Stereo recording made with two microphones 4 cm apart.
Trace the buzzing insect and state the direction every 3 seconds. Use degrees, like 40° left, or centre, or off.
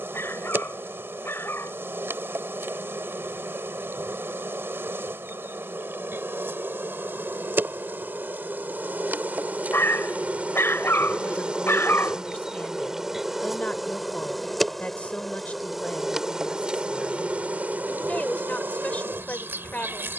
70° right, 70° right, 60° right, 40° right, 10° right, 20° right, 60° right.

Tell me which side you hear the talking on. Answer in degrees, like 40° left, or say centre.
40° left.